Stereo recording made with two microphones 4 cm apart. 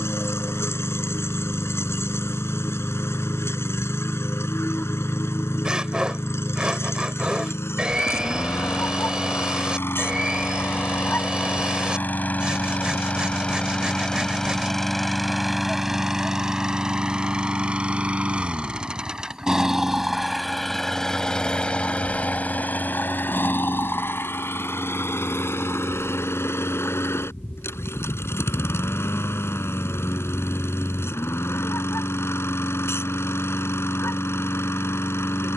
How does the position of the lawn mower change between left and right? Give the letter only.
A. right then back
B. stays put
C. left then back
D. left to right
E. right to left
A.